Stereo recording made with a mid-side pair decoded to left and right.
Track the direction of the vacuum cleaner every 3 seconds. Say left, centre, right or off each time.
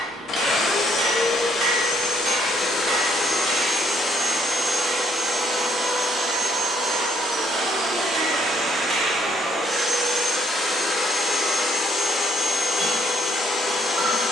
left, centre, right, centre, left.